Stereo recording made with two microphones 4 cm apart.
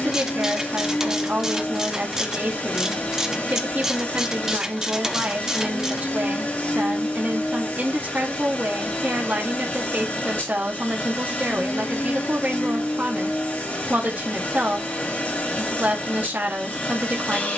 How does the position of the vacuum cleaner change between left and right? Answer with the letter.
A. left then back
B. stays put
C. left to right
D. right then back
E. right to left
B.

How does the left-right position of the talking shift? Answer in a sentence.
You can hear the talking stay in one place.